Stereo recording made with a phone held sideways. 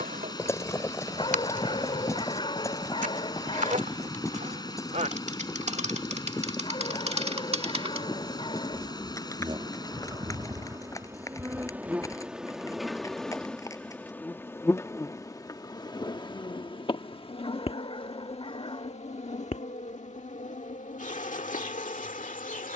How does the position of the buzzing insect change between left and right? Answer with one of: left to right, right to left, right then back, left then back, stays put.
right to left.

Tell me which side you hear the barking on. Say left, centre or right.
left.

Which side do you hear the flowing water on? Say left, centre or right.
left.